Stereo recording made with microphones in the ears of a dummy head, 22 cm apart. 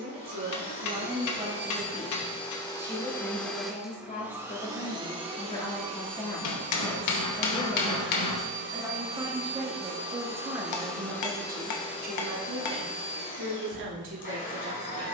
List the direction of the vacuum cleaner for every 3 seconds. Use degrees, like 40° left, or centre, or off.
30° left, 10° right, 40° right, 10° right, 30° left.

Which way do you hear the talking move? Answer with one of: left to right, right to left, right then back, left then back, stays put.
left then back.